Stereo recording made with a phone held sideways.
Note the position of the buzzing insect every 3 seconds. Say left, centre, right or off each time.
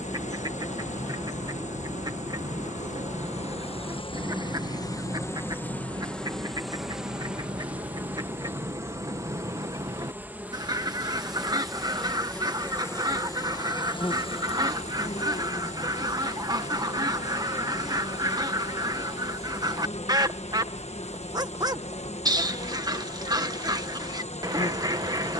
left, left, centre, centre, left, left, left, left, left.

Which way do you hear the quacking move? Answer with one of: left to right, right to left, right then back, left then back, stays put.
stays put.